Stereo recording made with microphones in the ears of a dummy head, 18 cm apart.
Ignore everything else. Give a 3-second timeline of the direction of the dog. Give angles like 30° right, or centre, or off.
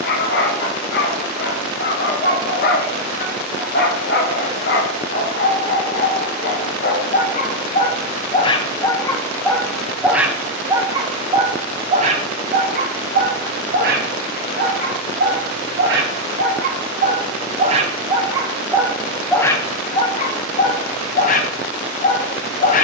50° left, 50° left, 40° left, 10° right, 50° right, 50° right, 10° left, 40° left.